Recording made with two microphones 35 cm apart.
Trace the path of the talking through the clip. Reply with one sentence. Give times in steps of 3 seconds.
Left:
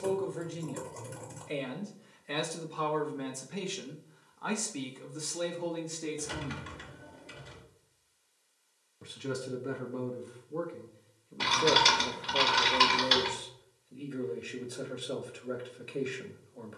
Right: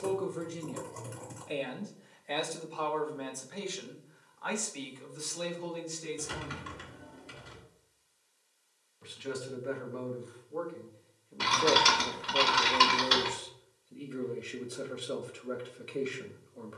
In this clip you hear the talking in the centre from 0 s, on the left from 3 s and in the centre from 12 s.